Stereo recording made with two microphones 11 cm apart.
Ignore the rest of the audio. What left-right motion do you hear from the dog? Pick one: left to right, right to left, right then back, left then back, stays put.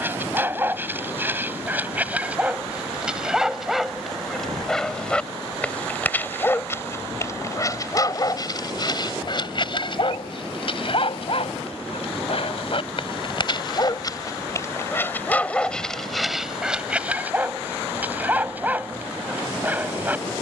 left then back.